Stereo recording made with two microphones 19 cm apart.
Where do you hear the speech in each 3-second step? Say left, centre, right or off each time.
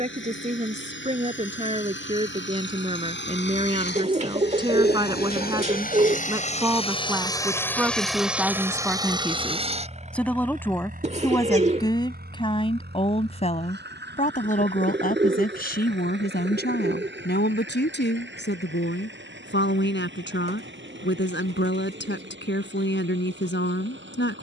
right, right, centre, centre, left, left, left, left.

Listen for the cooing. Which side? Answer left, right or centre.
right.